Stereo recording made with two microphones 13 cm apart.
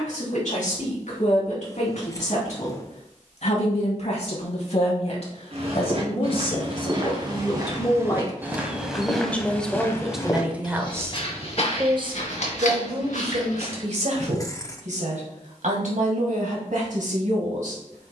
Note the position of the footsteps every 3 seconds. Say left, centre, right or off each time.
off, right, right, left, left, off.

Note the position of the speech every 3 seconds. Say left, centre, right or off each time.
left, left, left, centre, right, right.